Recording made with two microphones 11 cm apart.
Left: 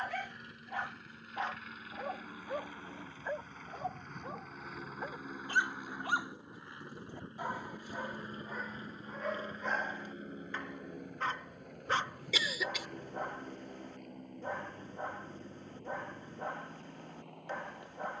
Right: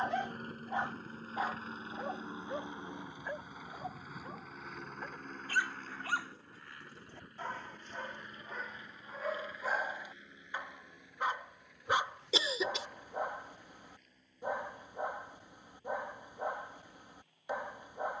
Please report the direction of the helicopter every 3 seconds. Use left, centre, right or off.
right, centre, left, left, left, left.